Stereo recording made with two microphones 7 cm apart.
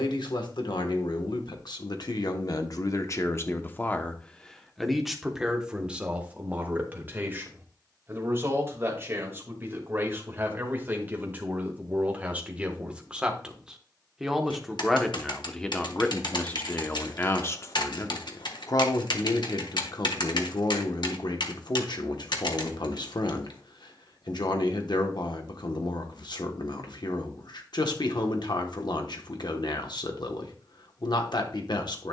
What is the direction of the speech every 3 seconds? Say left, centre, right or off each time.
left, centre, right, right, centre, left, left, left, left, left, left.